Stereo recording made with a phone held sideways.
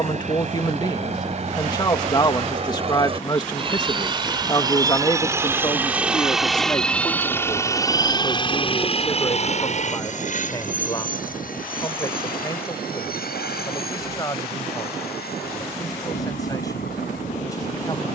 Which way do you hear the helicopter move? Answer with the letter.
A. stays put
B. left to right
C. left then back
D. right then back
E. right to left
E.